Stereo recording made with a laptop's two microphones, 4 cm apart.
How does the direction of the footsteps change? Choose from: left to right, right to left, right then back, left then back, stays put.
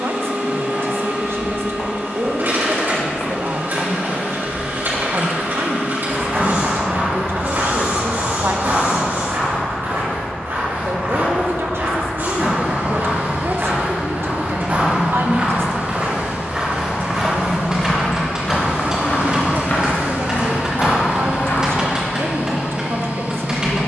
right then back.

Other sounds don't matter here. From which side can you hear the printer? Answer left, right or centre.
right.